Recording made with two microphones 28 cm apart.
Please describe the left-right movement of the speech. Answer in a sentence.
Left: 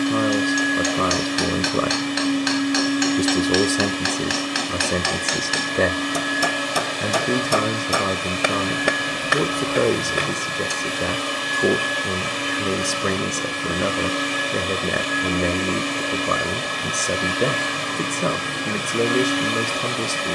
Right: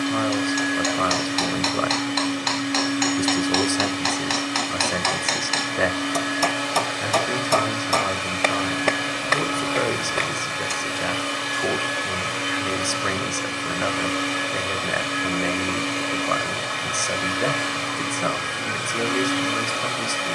In this clip you hear the speech stay in one place.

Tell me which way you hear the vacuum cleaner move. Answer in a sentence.
You can hear the vacuum cleaner stay put.